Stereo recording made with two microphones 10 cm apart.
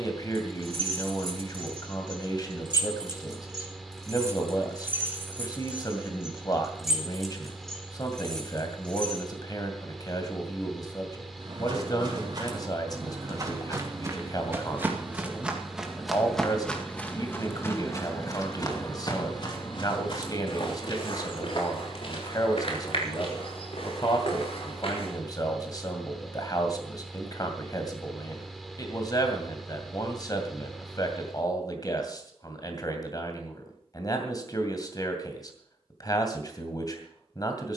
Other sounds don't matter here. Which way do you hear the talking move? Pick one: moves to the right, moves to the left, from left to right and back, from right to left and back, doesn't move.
doesn't move.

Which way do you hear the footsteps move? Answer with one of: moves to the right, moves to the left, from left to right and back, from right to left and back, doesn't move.
moves to the left.